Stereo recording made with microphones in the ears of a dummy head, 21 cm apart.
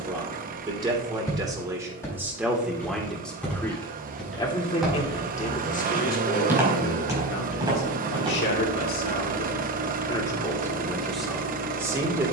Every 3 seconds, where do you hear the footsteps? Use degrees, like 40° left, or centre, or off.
10° left, centre, 20° right, off.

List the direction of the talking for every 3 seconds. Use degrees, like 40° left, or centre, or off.
10° right, 20° left, 40° left, 10° left.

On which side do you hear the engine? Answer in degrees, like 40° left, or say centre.
40° right.